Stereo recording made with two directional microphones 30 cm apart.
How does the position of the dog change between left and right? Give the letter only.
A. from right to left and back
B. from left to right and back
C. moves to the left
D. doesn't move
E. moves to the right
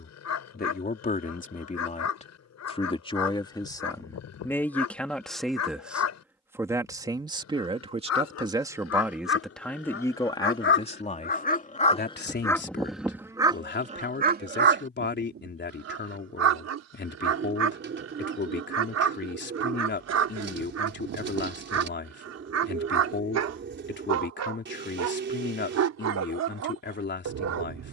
E.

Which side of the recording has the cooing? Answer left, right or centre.
right.